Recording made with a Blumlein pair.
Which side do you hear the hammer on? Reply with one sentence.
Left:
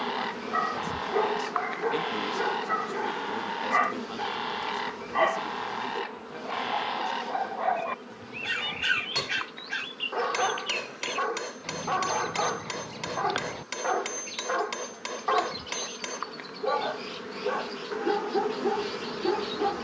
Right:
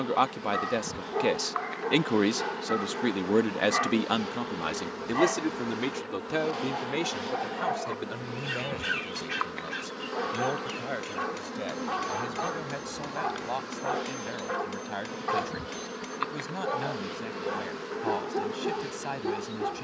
You can hear the hammer on the left.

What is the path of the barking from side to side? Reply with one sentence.
In this clip you hear the barking stay in one place.